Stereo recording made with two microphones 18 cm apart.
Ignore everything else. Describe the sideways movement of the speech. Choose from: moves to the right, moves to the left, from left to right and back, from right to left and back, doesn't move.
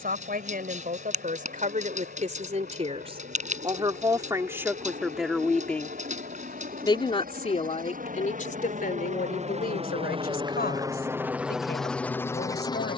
moves to the left.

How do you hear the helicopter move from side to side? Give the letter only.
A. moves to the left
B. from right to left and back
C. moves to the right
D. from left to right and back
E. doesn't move
A.